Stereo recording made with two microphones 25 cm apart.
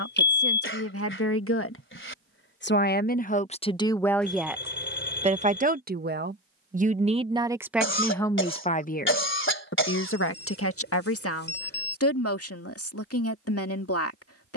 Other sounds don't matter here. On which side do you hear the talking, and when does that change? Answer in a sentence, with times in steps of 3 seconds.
You can hear the talking on the left from 0 s, in the centre from 3 s and on the left from 9 s.